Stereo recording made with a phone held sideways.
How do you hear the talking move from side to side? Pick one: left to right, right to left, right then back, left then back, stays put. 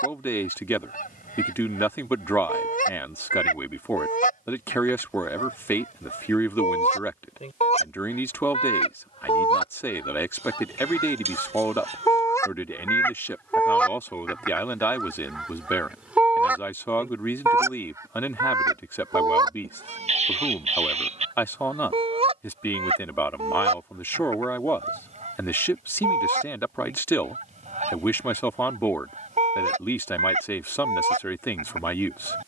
stays put.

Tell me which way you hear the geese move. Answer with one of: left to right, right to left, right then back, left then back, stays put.
left to right.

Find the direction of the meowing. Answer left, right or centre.
right.